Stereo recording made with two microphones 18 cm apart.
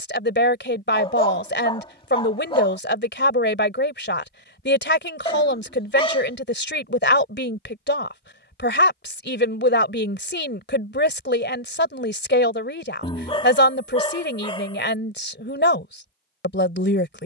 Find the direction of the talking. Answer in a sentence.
In this clip you hear the talking on the left.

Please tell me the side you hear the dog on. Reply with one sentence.
You can hear the dog on the left.